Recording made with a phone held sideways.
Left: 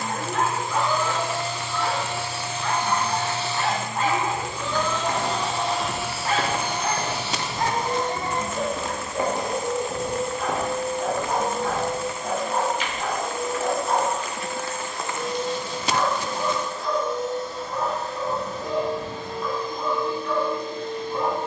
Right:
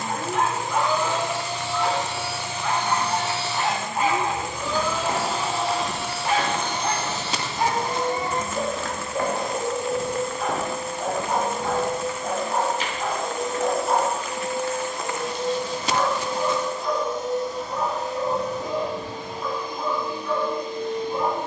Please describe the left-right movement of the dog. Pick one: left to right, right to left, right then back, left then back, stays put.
stays put.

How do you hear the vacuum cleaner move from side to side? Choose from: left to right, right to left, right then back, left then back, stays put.
left then back.